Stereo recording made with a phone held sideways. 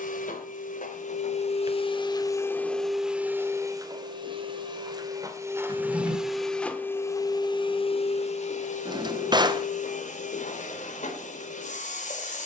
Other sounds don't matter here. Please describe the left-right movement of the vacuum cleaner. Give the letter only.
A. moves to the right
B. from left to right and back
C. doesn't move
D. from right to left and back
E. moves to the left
B.